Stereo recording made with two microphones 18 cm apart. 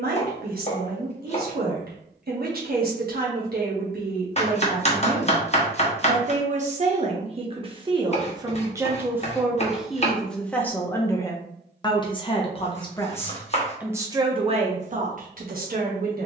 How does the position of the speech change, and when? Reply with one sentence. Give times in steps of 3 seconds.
In this clip you hear the speech on the right from 0 s, in the centre from 9 s and on the right from 15 s.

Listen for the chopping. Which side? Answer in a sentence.
You can hear the chopping on the left.